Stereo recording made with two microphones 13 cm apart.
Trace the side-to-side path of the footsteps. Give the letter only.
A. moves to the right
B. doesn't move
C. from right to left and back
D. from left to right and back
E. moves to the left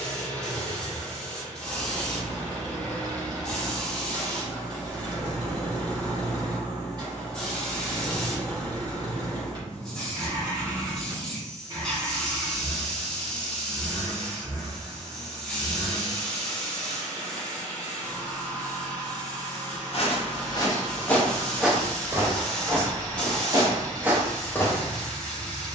D.